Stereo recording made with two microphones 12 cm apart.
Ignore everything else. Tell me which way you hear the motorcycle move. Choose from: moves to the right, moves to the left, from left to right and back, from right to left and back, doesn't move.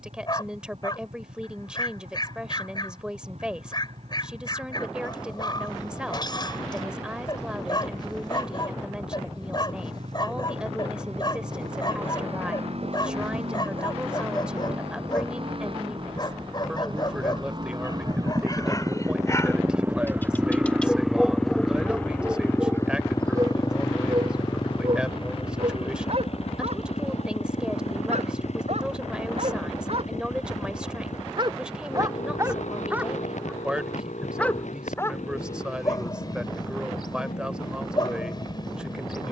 moves to the left.